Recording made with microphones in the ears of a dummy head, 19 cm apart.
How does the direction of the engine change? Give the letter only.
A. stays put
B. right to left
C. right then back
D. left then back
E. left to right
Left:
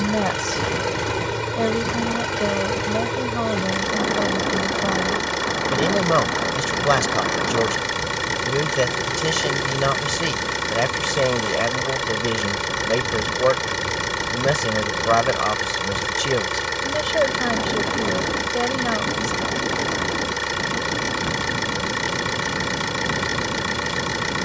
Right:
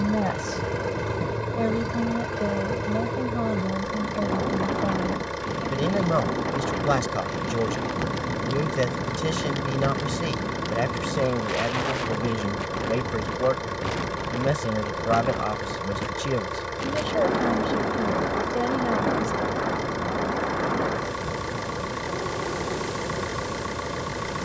A.